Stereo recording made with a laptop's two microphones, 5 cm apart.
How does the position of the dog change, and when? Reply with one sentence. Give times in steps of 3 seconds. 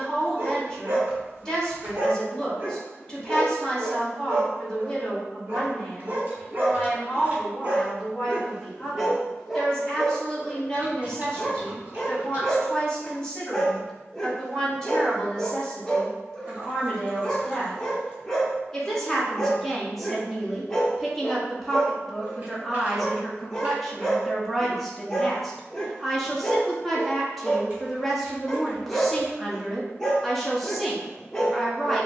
You can hear the dog on the right from 0 s and in the centre from 9 s.